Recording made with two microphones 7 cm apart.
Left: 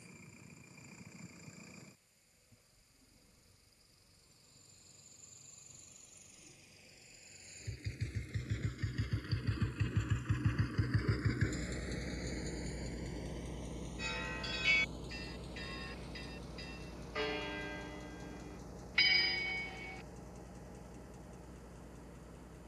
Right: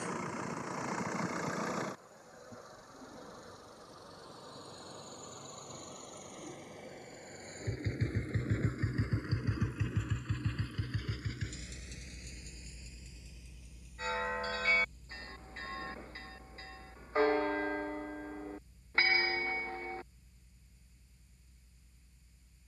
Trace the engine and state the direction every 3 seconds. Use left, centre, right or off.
right, right, right, centre, left, left, left, left.